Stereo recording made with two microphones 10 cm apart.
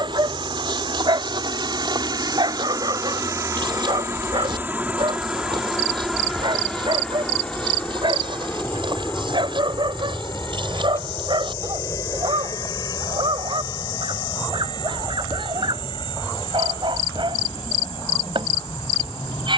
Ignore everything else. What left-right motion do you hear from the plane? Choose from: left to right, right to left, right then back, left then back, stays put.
right to left.